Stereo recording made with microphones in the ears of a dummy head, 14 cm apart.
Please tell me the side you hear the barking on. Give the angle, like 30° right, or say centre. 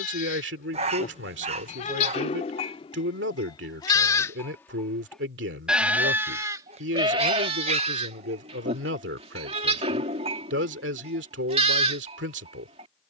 40° right.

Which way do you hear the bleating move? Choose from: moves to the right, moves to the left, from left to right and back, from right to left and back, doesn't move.
moves to the right.